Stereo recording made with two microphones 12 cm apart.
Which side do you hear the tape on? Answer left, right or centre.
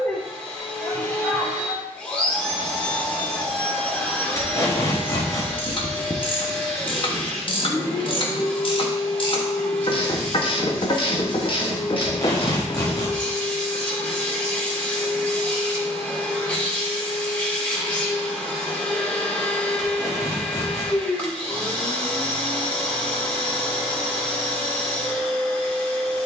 left.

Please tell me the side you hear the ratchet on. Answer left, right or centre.
left.